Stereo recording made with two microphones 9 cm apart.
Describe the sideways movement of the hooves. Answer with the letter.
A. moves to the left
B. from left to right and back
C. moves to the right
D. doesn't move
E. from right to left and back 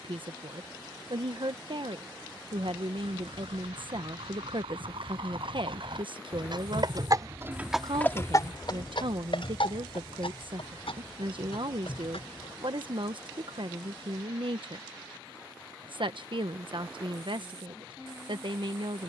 A.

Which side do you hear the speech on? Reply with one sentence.
You can hear the speech on the right.